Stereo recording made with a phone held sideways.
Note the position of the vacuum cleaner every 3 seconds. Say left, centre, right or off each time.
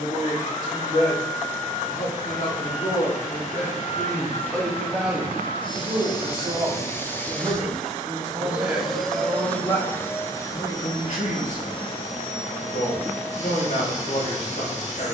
left, left, centre, left, left.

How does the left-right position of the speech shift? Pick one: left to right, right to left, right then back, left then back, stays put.
right then back.